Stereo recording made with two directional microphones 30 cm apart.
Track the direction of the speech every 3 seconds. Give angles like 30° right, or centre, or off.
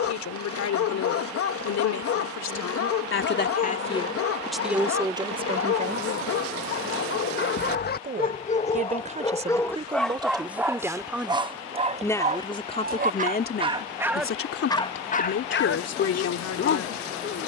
60° left, centre, 30° right, 10° right, 30° left, 60° left.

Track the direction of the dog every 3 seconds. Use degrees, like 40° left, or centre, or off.
50° left, 50° left, 40° left, centre, 20° right, 40° left.